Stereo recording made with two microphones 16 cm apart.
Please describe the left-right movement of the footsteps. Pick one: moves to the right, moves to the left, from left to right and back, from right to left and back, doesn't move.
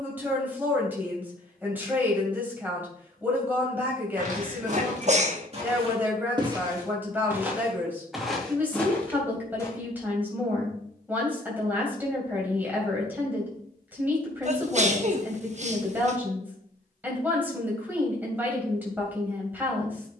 moves to the left.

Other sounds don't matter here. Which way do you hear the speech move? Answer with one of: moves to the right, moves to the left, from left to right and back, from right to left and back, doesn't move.
doesn't move.